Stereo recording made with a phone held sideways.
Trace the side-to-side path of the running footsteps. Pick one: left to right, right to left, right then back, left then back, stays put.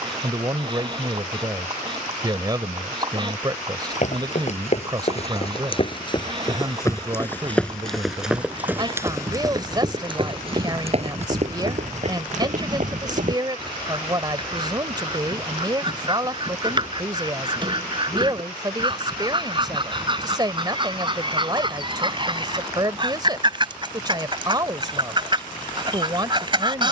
left to right.